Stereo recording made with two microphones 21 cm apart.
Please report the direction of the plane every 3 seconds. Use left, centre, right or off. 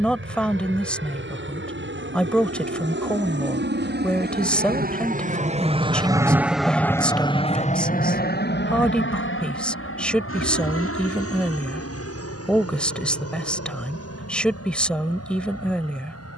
right, right, left, left, left, left.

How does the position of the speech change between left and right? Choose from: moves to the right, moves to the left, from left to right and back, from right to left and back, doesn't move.
doesn't move.